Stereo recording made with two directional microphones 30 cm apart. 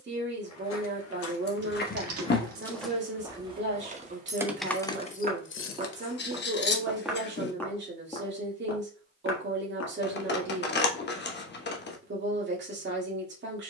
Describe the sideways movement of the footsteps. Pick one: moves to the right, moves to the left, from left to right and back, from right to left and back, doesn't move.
from left to right and back.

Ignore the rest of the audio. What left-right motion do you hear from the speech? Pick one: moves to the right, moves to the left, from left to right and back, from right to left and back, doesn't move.
doesn't move.